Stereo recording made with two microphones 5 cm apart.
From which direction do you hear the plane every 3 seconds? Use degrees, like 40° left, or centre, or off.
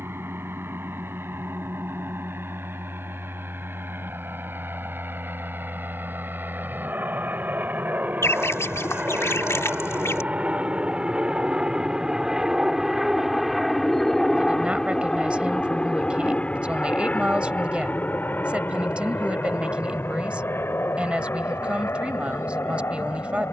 60° right, 60° right, 50° right, 30° right, centre, 20° left, 40° left, 60° left.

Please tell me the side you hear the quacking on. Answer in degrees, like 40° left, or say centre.
80° left.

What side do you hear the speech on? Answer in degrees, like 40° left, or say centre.
20° right.